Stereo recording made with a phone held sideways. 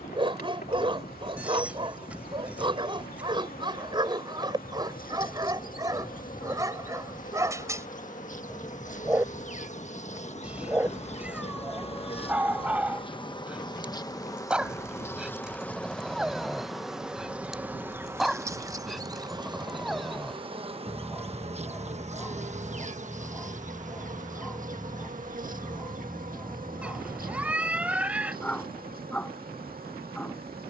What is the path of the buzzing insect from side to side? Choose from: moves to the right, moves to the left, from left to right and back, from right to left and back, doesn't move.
moves to the right.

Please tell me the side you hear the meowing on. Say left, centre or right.
centre.